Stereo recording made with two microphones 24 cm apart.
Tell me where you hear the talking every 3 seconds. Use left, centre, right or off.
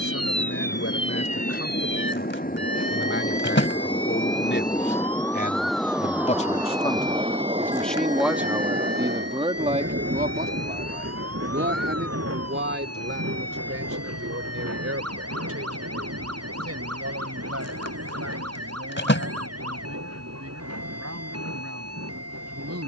left, left, centre, right, right, right, right, right.